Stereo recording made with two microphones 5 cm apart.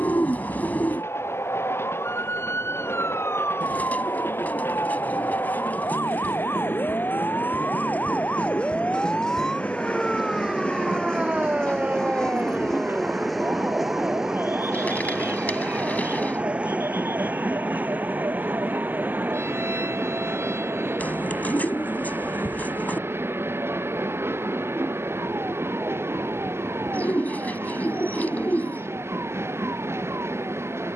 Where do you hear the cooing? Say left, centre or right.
left.